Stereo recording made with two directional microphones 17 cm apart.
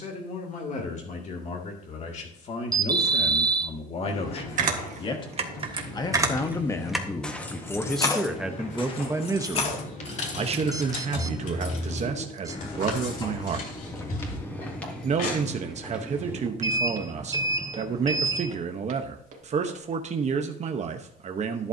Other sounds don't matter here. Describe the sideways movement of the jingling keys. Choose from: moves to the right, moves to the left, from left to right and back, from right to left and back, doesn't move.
moves to the left.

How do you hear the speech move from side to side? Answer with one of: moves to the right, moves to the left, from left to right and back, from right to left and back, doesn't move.
moves to the right.